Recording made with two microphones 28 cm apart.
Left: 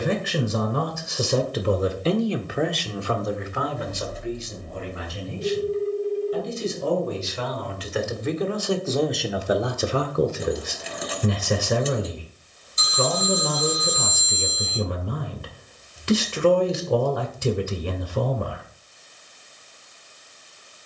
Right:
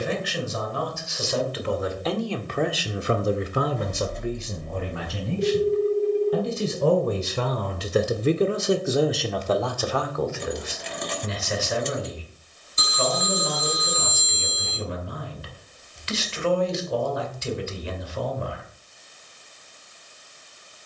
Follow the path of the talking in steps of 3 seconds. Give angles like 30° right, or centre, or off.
40° left, 50° right, 40° right, 30° left, 50° left, 50° left, 50° left.